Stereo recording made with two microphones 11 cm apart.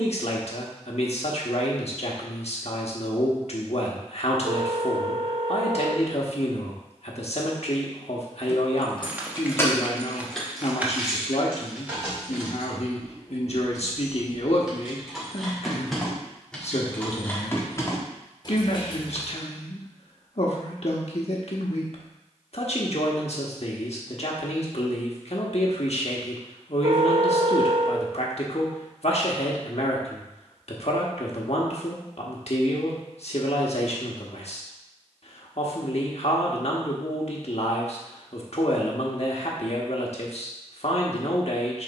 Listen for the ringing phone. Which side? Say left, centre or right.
right.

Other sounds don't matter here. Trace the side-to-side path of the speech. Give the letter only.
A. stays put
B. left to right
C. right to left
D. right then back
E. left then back
A.